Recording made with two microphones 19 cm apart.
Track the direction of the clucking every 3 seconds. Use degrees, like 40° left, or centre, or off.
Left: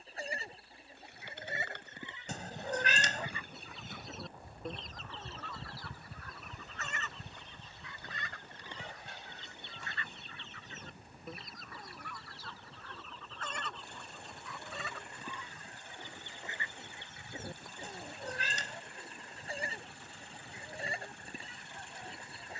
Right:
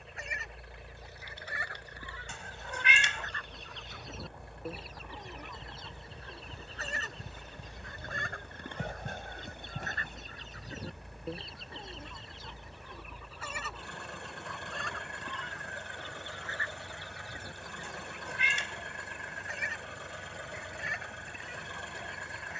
20° left, 10° right, 40° right, 40° right, 10° right, 20° left, 30° left, 30° left.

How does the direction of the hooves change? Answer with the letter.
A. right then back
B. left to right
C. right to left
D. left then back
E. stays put
B.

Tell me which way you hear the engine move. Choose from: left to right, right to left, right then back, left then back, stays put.
stays put.